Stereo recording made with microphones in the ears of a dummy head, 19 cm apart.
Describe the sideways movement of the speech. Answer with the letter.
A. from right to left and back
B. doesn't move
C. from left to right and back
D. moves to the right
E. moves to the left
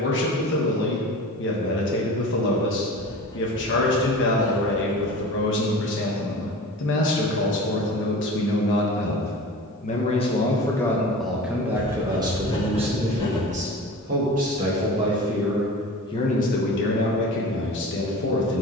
C.